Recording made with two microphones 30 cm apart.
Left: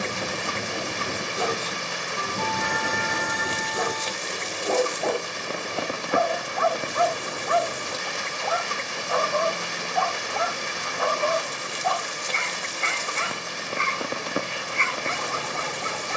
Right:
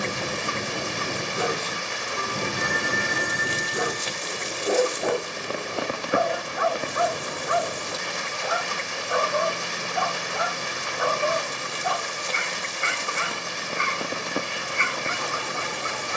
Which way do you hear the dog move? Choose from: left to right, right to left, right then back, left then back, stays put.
stays put.